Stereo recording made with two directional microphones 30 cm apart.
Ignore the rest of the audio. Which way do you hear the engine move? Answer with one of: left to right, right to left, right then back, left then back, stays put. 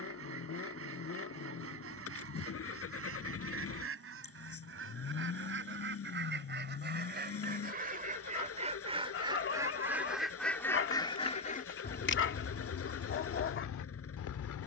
stays put.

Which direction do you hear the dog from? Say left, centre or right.
left.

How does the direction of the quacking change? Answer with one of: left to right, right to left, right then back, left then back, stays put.
right to left.